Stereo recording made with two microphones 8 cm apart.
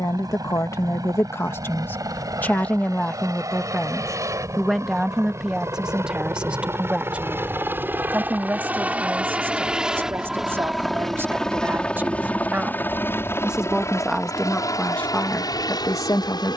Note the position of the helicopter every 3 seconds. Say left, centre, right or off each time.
right, right, right, centre, left, left.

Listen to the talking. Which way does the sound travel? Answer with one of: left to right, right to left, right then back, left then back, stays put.
right then back.